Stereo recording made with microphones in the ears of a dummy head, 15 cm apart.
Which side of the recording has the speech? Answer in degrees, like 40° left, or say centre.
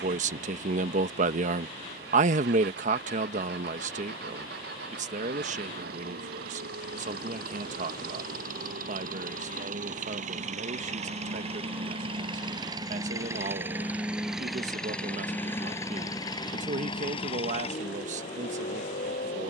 50° right.